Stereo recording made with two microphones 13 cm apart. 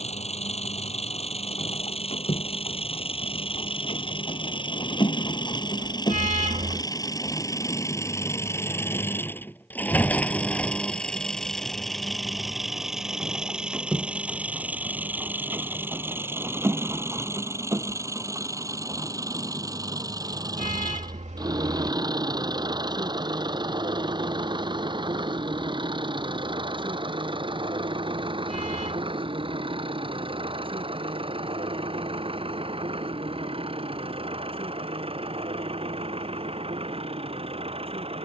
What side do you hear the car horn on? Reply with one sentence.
You can hear the car horn on the right.